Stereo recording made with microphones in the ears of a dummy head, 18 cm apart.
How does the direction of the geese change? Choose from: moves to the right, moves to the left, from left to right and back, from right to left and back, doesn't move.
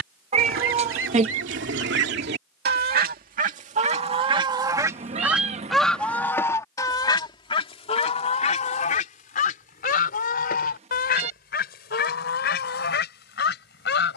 moves to the left.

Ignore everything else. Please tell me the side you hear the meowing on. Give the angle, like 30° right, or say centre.
30° right.